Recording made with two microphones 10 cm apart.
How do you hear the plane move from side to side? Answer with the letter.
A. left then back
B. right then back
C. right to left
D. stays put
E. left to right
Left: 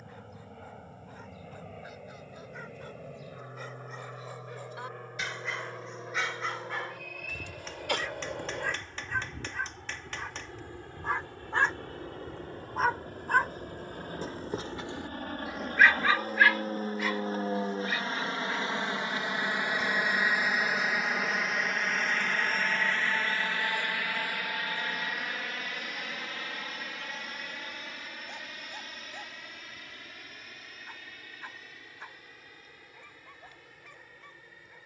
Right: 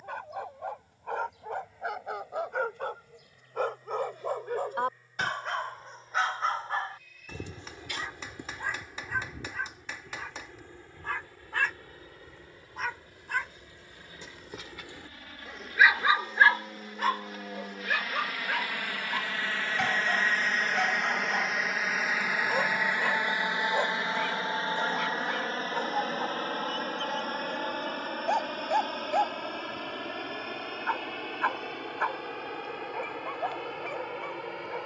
E.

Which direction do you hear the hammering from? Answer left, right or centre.
centre.